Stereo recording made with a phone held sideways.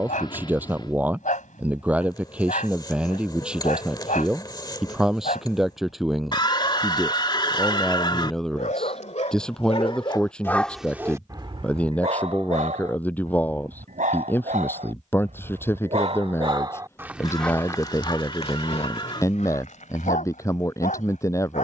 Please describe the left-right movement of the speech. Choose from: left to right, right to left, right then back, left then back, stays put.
right to left.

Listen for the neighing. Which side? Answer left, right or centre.
left.